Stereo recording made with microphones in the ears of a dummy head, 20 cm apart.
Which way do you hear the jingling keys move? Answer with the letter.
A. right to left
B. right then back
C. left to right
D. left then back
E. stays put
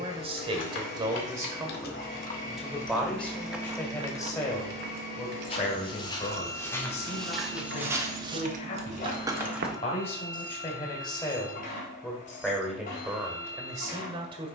B.